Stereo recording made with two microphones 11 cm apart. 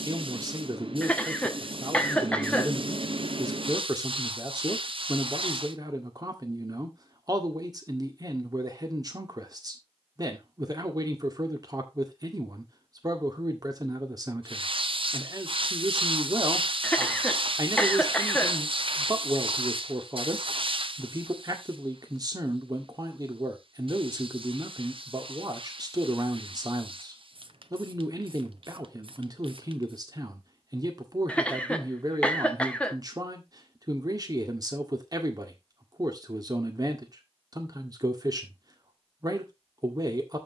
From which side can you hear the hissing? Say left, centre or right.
right.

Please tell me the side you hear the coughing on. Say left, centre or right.
centre.